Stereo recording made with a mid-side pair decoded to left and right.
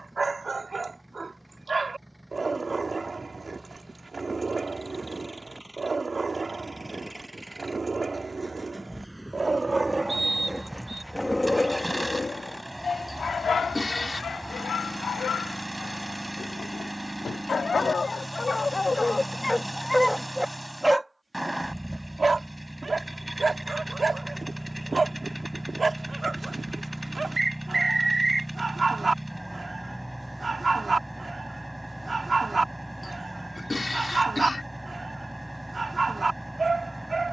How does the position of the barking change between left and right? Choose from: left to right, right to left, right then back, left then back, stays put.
left then back.